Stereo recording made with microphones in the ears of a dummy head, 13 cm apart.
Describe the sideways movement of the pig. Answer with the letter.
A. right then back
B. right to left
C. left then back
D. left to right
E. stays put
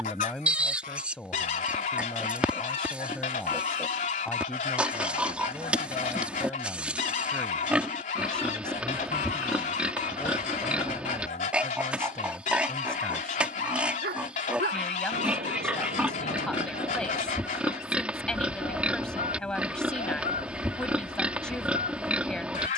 E.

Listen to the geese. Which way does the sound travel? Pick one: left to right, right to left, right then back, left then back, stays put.
stays put.